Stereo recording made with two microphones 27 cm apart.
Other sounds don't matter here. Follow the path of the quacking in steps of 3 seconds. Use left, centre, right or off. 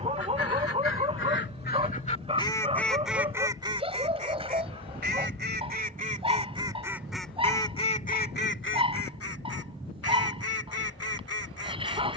left, right, centre, left.